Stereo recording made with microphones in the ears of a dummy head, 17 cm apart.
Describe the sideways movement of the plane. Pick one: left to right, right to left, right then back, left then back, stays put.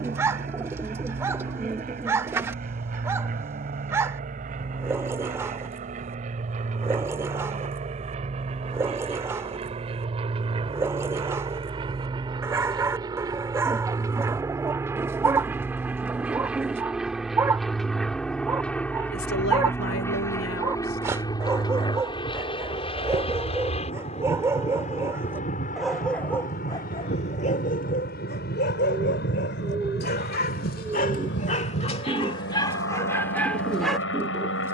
right to left.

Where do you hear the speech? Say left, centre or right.
left.